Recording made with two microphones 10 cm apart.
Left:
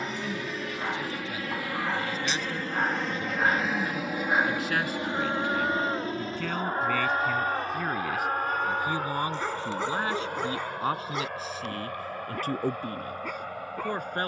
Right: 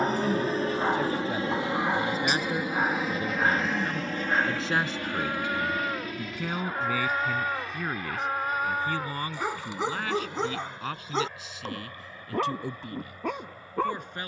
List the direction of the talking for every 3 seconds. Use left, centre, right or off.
right, right, centre, left, left.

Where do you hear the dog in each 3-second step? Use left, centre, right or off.
right, centre, centre, right, right.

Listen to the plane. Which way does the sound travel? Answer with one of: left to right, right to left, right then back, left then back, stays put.
right to left.